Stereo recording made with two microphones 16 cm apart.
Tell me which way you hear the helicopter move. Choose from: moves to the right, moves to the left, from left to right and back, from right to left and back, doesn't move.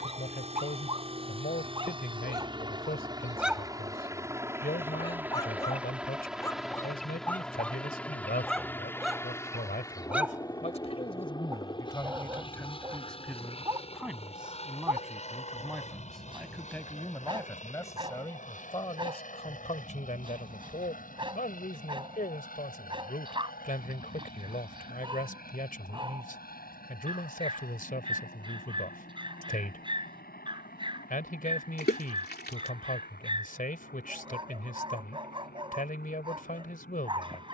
moves to the left.